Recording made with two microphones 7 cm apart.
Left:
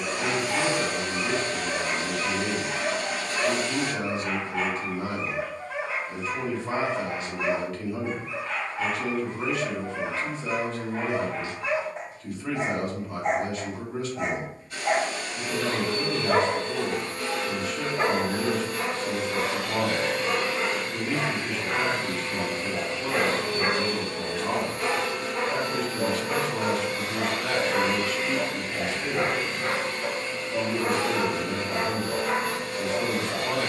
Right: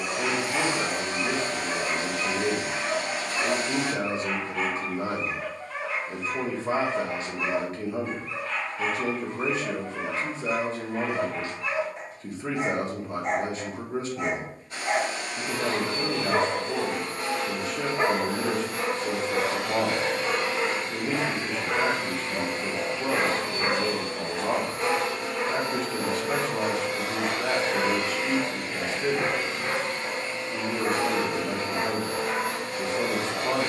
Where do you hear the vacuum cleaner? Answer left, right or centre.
right.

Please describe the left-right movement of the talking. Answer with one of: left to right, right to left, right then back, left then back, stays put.
stays put.